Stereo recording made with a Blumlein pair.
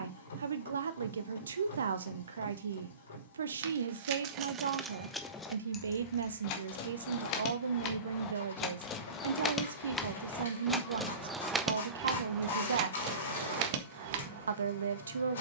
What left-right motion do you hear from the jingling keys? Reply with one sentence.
In this clip you hear the jingling keys go left and come back.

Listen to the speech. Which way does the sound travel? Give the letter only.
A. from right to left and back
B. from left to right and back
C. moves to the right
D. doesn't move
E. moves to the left
D.